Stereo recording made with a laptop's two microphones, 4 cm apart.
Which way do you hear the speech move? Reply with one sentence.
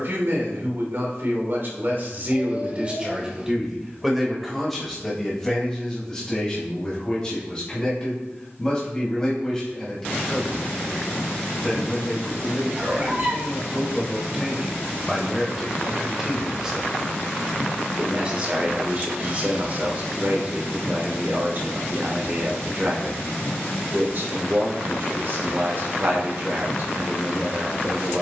In this clip you hear the speech go left and come back.